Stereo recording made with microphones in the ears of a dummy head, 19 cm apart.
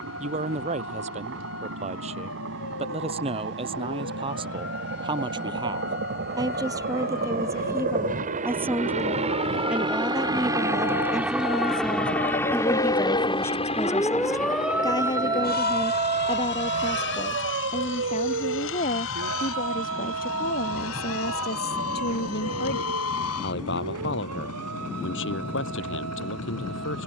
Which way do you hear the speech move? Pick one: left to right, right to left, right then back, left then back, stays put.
right to left.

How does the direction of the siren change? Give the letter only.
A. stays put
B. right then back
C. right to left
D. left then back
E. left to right
E.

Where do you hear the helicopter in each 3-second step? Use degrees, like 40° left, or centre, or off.
60° right, 60° right, 40° right, 20° right, 20° left, 50° left, 70° left, 70° left, 80° left.